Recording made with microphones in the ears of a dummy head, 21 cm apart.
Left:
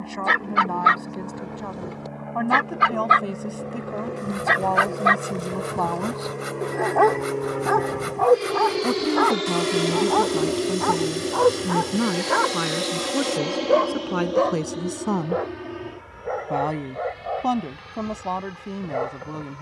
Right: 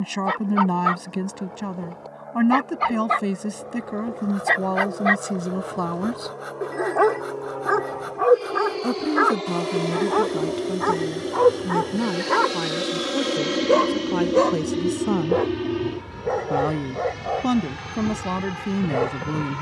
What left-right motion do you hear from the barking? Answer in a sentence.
You can hear the barking go from the left side to the right.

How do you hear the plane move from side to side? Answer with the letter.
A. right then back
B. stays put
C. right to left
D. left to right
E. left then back
D.